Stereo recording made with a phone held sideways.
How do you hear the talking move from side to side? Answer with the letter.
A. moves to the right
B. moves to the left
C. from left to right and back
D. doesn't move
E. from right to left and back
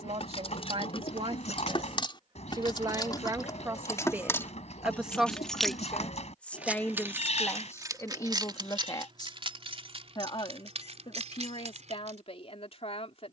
B.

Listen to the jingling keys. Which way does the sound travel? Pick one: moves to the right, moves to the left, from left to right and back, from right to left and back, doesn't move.
moves to the right.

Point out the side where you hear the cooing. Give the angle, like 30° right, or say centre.
60° left.